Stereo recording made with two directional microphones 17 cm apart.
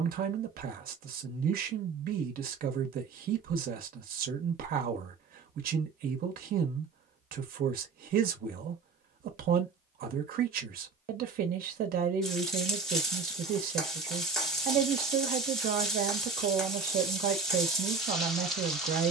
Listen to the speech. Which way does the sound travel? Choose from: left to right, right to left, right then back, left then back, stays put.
stays put.